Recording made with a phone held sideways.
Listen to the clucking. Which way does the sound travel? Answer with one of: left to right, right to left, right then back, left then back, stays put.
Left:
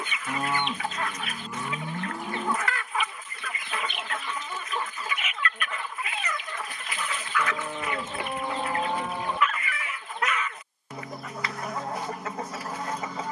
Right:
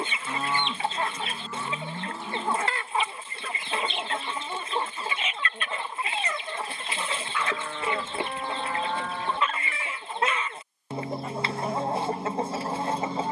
stays put.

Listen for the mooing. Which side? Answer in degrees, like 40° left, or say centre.
20° left.